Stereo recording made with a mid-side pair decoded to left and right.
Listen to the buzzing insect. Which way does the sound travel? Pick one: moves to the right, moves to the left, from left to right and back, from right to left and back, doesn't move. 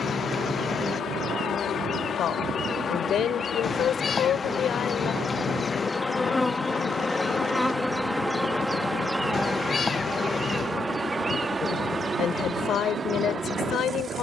moves to the right.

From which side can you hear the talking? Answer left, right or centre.
left.